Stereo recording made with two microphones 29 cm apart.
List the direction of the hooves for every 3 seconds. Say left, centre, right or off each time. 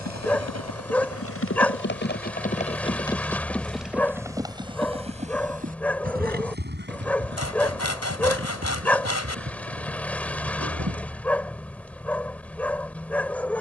left, centre, right, right, off.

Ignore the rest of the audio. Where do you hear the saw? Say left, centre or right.
left.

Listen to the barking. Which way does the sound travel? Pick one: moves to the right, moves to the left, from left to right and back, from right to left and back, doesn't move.
doesn't move.